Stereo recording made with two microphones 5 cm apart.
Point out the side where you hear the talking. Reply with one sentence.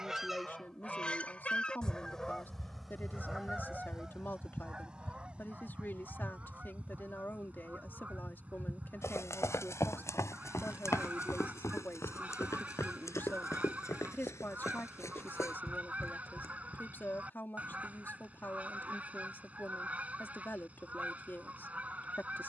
In this clip you hear the talking on the left.